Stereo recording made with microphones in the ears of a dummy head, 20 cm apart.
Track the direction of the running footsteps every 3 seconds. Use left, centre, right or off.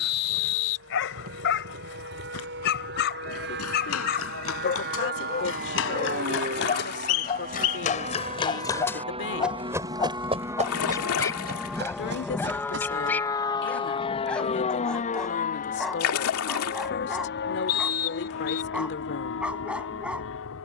left, left, left, right, right, off, off.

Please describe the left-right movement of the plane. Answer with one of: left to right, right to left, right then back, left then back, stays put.
right to left.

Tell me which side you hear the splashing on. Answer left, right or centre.
left.